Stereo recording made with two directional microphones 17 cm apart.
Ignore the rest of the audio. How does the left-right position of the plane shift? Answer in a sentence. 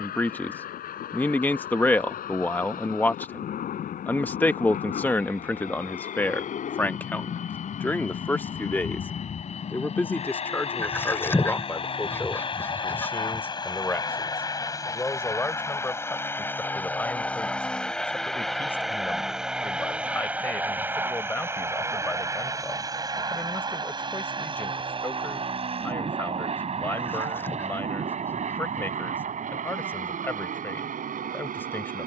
You can hear the plane move from left to right.